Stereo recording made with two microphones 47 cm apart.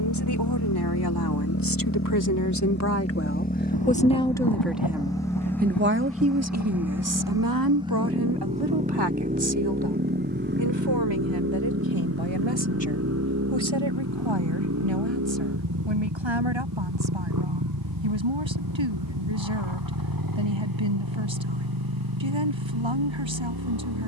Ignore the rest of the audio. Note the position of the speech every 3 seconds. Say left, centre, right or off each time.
left, centre, right, right, right, right, right, right.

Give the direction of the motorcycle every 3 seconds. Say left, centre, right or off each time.
left, centre, centre, right, right, right, right, right.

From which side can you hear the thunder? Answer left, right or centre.
left.